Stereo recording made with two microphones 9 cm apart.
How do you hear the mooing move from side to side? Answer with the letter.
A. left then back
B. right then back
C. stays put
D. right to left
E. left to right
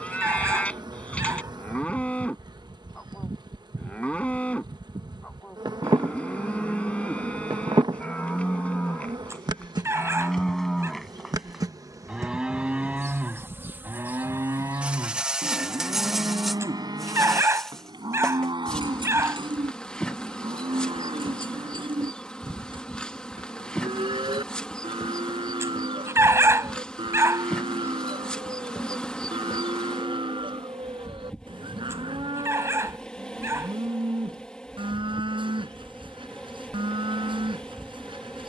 E.